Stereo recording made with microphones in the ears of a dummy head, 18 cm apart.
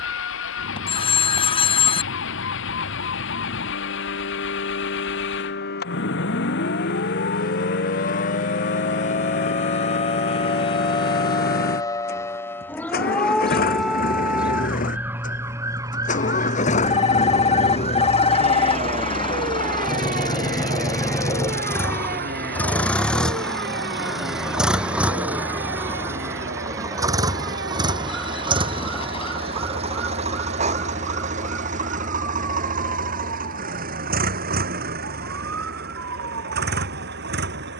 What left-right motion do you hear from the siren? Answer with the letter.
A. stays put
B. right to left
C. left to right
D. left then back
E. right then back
C.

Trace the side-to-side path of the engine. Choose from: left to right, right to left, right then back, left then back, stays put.
left to right.